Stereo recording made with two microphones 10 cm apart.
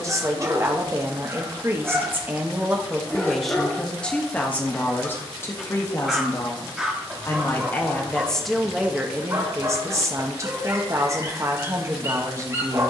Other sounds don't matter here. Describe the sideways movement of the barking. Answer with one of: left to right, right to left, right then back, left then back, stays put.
left then back.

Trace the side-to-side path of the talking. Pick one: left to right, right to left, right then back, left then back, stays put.
left then back.